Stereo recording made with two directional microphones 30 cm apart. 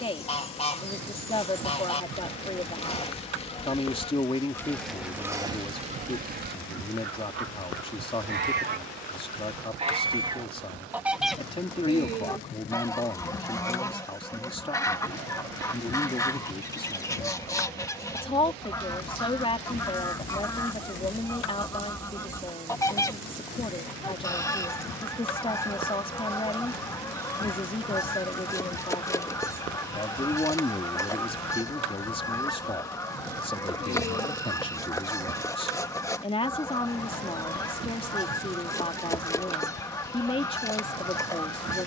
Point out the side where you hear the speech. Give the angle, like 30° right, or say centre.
20° left.